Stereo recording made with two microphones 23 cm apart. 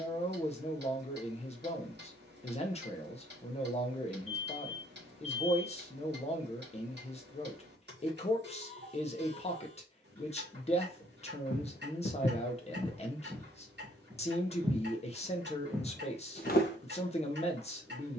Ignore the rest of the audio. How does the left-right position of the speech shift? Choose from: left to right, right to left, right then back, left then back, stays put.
stays put.